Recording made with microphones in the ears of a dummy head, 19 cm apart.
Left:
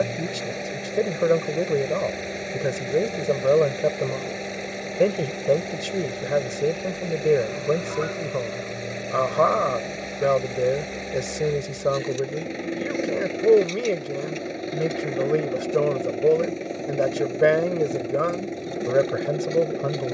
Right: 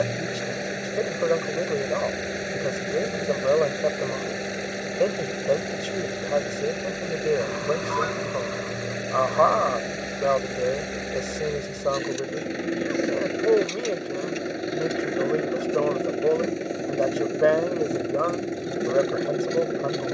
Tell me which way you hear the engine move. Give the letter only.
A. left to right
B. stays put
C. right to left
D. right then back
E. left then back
B.